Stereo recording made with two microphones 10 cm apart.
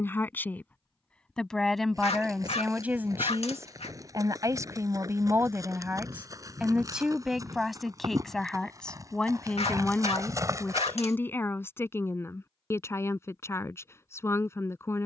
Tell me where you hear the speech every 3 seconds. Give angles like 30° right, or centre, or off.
centre, 30° right, centre, 20° left, 30° left.